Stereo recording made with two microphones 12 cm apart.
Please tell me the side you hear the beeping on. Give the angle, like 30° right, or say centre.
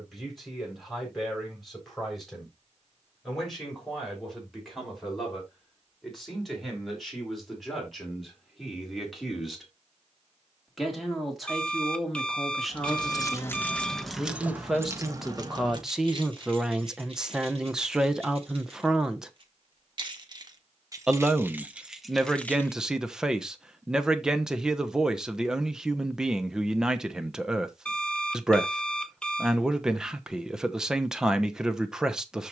10° left.